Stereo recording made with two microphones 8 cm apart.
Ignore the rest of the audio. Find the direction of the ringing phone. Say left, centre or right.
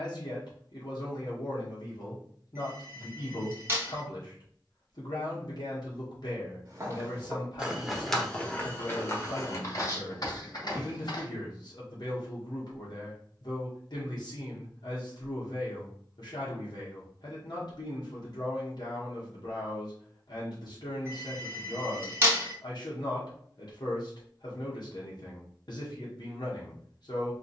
right.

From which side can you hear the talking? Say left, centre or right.
left.